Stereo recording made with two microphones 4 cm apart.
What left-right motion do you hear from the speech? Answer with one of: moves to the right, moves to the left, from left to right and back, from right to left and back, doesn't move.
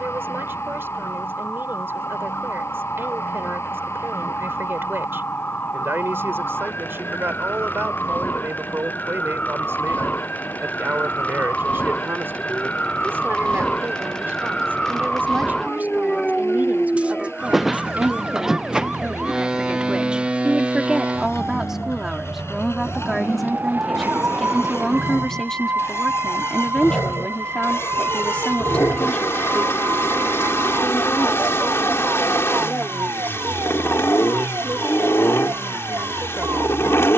moves to the left.